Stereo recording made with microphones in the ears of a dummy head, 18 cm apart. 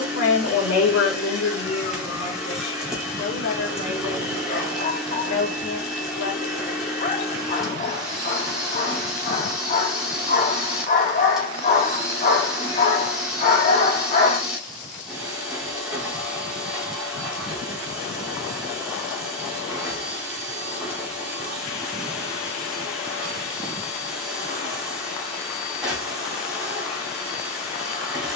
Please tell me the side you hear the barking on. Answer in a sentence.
In this clip you hear the barking on the left.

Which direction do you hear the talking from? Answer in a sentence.
You can hear the talking on the left.